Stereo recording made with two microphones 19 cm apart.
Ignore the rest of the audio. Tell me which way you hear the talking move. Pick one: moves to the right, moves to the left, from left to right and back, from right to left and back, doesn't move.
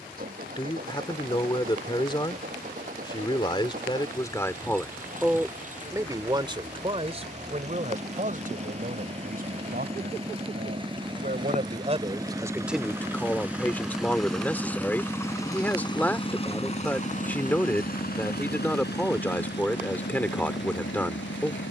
from left to right and back.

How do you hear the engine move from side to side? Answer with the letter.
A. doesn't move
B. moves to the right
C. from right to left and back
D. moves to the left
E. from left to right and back
D.